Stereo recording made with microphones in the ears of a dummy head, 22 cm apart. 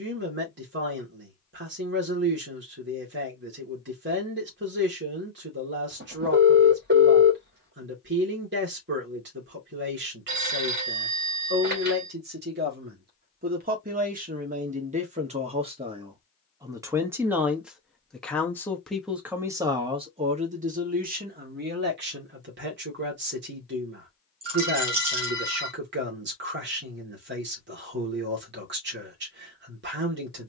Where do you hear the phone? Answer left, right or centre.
right.